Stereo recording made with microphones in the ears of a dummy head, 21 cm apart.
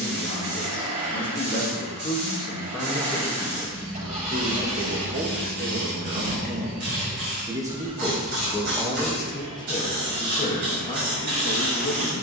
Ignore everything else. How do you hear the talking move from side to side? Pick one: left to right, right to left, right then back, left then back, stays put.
right then back.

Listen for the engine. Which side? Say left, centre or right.
right.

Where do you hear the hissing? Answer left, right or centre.
right.